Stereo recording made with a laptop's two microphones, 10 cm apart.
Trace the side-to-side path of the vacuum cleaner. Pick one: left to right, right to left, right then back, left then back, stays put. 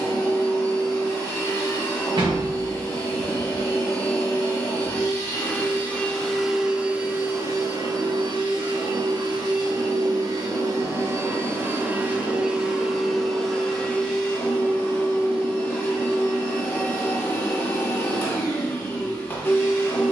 right then back.